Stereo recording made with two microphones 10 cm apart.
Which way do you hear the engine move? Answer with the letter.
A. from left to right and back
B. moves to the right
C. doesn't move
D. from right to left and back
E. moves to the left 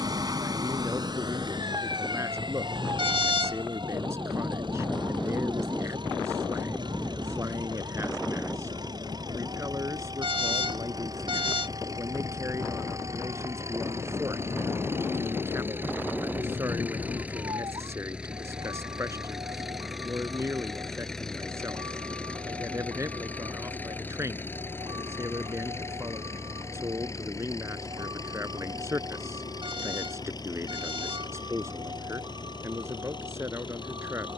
E.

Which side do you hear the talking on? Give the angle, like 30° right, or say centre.
30° right.